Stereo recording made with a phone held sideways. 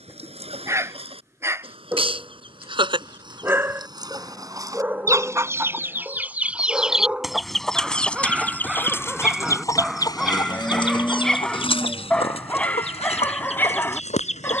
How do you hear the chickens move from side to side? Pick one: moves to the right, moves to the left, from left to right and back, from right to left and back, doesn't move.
moves to the left.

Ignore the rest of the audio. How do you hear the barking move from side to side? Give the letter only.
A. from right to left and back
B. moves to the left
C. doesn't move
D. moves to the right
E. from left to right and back
B.